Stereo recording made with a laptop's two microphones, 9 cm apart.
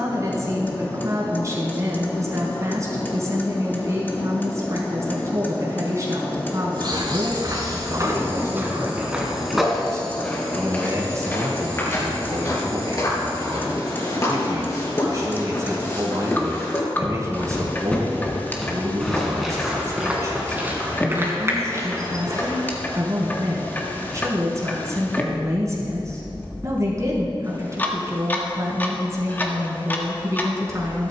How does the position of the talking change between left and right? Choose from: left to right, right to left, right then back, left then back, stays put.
stays put.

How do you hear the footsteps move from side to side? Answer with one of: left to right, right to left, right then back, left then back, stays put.
left then back.